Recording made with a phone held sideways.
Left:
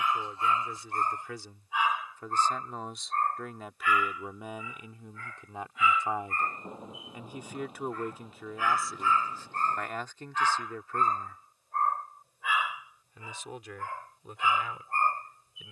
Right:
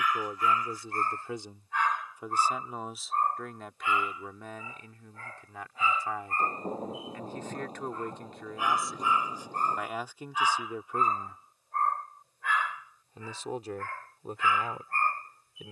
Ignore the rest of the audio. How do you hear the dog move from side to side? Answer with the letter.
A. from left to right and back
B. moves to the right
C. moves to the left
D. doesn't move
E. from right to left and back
A.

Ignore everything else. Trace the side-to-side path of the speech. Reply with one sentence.
You can hear the speech move from right to left and back again.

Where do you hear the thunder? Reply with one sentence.
You can hear the thunder on the right.